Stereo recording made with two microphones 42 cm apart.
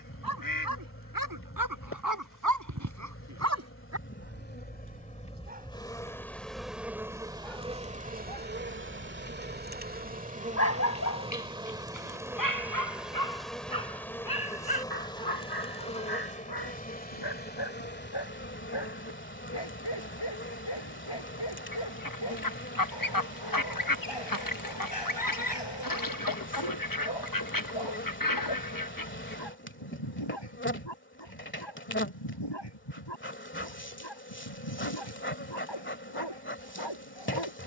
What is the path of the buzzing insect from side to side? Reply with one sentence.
You can hear the buzzing insect go right and come back.